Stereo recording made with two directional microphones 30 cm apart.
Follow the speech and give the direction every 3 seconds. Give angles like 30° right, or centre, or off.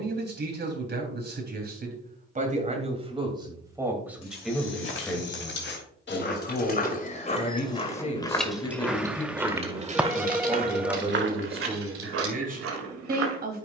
30° right, centre, 30° left, 10° right, 30° right.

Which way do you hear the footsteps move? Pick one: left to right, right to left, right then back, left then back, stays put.
left to right.